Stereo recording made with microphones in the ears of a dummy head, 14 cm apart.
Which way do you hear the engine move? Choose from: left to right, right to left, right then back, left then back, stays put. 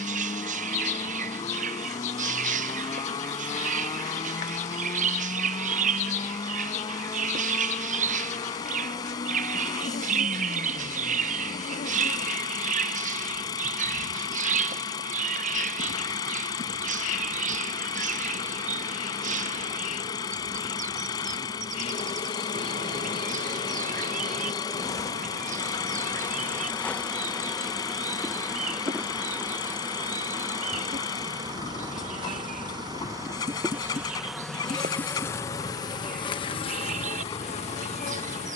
stays put.